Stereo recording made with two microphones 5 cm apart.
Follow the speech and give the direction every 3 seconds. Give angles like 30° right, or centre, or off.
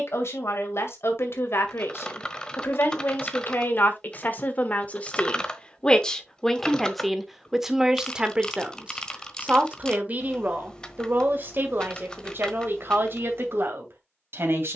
60° left, 40° left, centre, 40° right, 50° right.